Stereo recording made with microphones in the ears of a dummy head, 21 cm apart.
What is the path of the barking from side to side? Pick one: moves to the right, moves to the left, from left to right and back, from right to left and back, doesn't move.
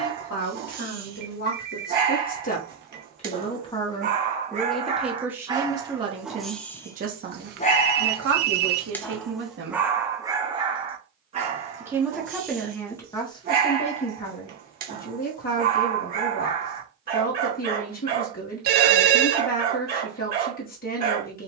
from right to left and back.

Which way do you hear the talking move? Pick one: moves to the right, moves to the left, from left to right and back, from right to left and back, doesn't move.
from left to right and back.